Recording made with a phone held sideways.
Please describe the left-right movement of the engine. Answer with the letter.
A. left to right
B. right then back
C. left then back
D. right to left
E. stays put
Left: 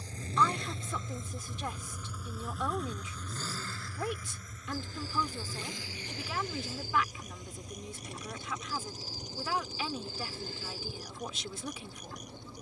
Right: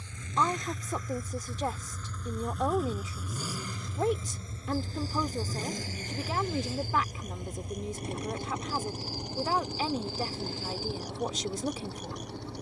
A.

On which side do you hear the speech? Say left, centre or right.
right.